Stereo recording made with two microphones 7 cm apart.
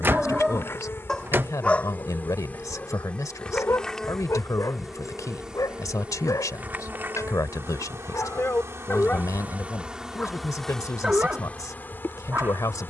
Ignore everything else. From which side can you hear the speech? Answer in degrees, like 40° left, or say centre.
50° left.